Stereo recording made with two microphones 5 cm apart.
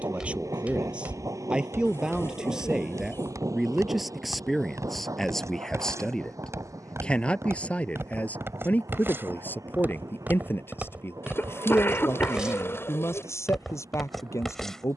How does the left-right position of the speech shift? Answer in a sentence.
In this clip you hear the speech move to the left.